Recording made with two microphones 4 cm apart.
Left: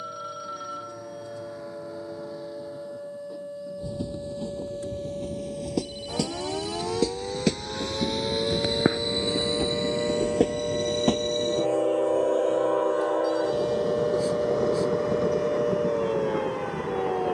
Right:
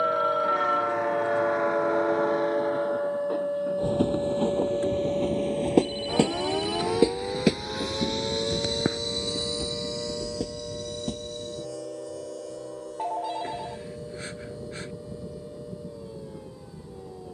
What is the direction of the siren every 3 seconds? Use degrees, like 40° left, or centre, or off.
50° right, 30° right, centre, 30° left, 50° left, 60° left.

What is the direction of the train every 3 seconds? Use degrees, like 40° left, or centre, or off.
70° right, 50° right, 10° right, 50° left, 70° left, 80° left.